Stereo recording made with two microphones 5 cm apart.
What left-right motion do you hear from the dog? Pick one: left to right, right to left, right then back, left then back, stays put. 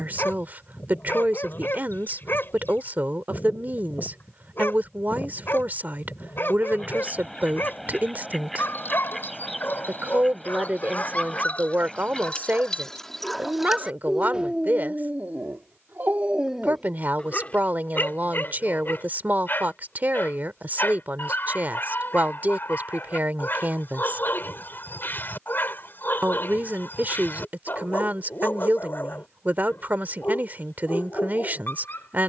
right then back.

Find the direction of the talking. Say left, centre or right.
right.